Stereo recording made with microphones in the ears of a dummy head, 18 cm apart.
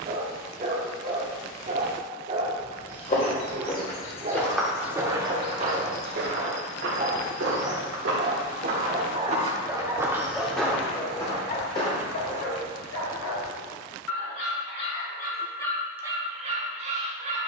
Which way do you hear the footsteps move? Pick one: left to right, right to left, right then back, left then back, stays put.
right then back.